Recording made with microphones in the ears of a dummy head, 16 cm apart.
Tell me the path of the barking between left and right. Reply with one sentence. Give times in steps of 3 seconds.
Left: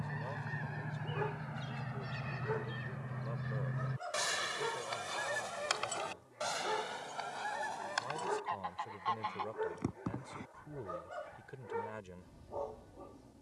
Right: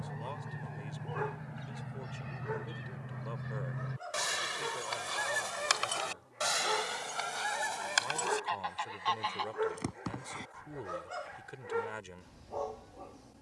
You can hear the barking on the right from 0 s, in the centre from 3 s and on the right from 6 s.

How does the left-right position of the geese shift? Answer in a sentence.
In this clip you hear the geese move from left to right.